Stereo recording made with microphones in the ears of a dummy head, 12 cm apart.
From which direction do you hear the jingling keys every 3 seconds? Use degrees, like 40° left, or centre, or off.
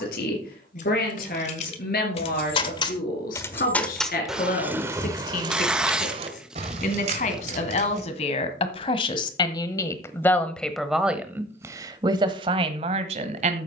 50° left, 10° right, 50° right, off, off.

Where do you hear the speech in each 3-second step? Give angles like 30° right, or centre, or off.
70° left, 70° left, 50° left, 10° left, 40° right.